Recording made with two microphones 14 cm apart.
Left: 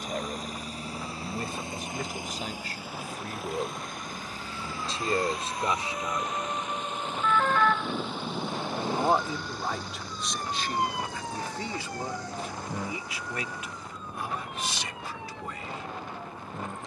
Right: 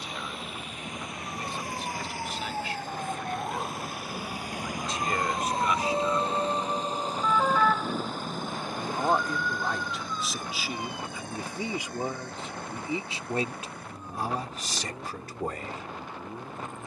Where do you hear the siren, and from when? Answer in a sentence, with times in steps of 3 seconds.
In this clip you hear the siren on the right from 0 s, in the centre from 6 s and on the left from 9 s.